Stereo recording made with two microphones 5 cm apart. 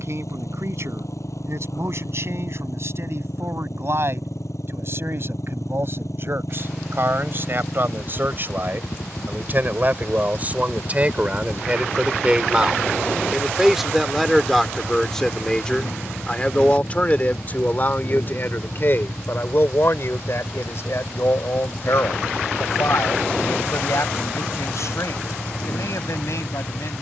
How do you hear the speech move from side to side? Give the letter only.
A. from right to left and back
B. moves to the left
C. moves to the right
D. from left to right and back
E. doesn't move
B.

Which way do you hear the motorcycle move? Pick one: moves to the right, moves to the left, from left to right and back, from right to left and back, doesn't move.
doesn't move.